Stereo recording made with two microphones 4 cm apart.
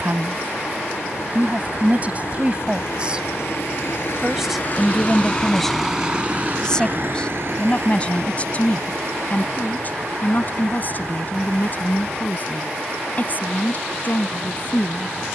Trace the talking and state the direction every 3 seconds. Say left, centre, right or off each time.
right, centre, left, left, left.